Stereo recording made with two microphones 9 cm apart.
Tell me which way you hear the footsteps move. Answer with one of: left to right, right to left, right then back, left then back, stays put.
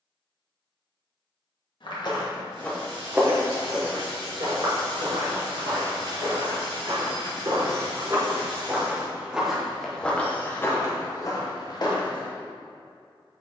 right then back.